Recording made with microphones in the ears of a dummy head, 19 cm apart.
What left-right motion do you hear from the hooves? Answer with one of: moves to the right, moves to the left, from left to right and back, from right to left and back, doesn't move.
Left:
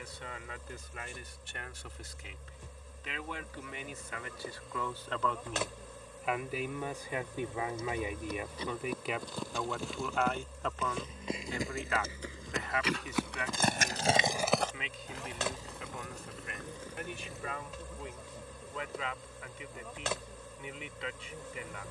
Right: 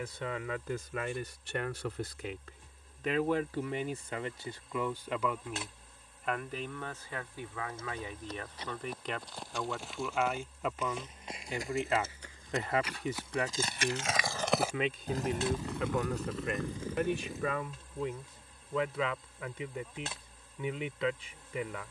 moves to the right.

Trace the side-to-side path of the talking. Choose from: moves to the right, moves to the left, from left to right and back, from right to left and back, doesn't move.
from right to left and back.